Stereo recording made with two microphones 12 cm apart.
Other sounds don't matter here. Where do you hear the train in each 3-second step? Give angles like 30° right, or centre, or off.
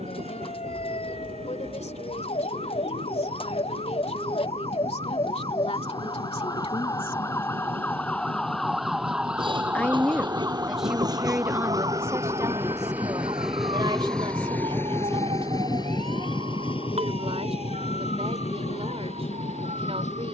60° right, 60° right, 50° right, 40° right, centre, 40° left, 70° left.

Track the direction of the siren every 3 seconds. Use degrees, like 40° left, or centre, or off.
70° left, 50° left, 20° left, 20° right, 50° right, 60° right, 60° right.